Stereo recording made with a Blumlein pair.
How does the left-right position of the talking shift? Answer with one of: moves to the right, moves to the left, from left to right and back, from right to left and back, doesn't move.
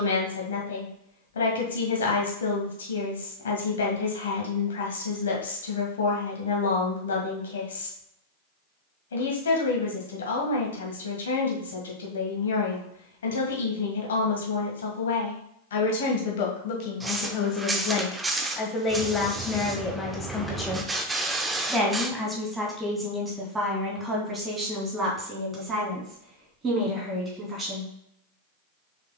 moves to the right.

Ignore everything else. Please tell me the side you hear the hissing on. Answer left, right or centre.
centre.